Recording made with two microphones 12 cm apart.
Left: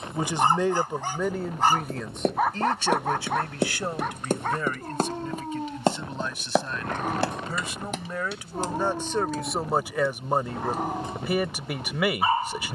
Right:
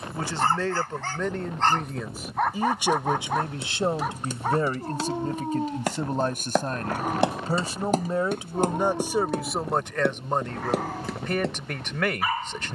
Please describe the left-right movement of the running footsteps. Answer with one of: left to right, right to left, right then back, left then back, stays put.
left to right.